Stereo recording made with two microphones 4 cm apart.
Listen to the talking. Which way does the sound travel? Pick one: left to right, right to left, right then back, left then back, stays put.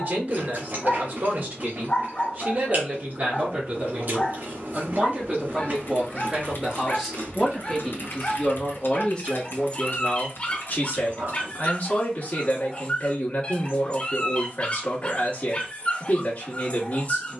right to left.